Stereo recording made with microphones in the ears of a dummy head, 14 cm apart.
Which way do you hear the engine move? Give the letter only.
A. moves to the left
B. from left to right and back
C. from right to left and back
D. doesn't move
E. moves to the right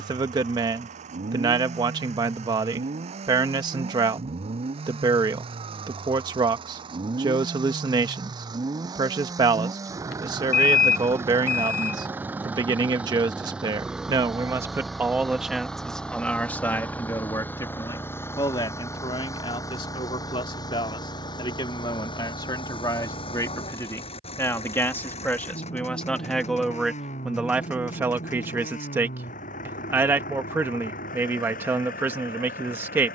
A.